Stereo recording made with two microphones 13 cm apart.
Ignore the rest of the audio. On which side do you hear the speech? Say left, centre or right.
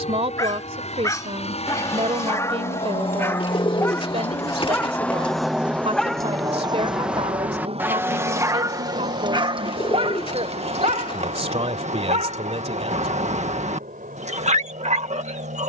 right.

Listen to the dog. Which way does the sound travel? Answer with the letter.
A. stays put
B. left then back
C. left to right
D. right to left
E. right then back
C.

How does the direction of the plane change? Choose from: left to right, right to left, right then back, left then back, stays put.
left to right.